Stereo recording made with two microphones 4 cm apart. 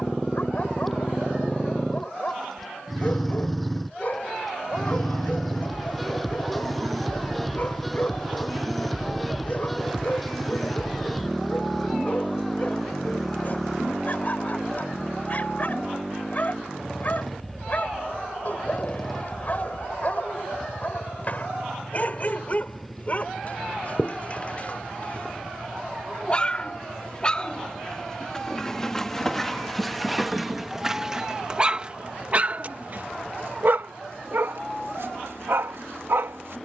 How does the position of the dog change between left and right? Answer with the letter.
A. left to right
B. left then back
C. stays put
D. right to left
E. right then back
A.